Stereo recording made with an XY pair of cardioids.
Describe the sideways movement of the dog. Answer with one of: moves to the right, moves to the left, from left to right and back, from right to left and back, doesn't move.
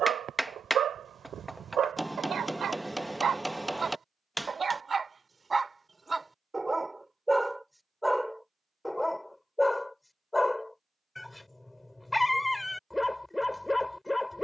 moves to the left.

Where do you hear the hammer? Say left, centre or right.
centre.